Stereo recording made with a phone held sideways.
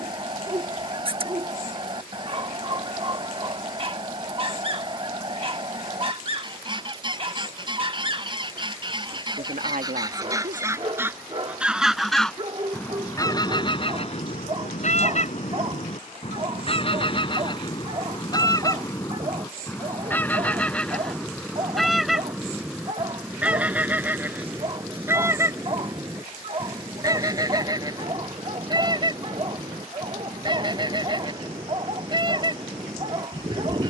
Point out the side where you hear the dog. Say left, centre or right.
right.